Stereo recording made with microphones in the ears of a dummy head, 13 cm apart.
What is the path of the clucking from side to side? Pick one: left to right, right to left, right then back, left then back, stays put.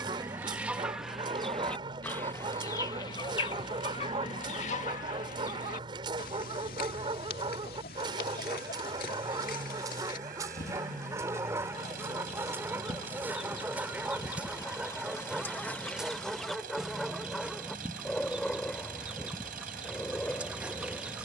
left then back.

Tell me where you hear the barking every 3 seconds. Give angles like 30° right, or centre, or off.
30° right, 30° right, 30° right, 20° right, 10° right, centre, 10° left.